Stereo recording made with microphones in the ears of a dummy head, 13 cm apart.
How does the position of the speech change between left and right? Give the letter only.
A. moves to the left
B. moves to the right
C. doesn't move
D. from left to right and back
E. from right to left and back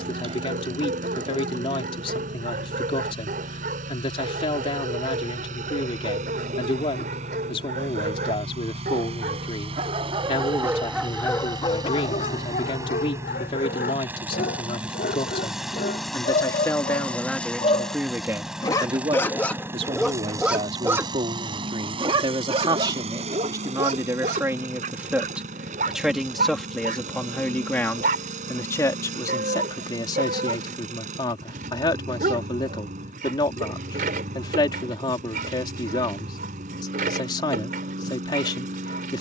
D.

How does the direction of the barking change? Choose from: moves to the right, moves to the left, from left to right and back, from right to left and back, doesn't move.
from right to left and back.